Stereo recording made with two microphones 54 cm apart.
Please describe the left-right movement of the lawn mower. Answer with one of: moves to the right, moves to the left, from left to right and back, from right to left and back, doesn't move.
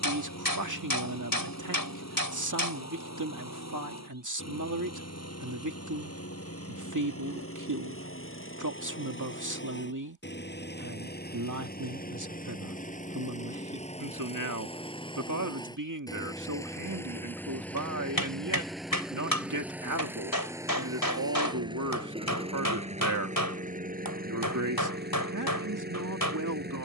moves to the right.